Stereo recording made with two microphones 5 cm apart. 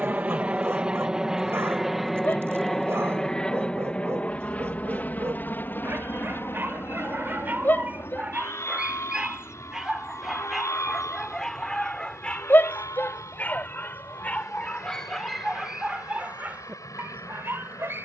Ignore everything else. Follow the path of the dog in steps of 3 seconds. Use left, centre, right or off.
right, right, right, centre, left, right.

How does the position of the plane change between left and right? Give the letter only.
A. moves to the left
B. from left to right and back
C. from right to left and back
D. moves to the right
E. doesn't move
A.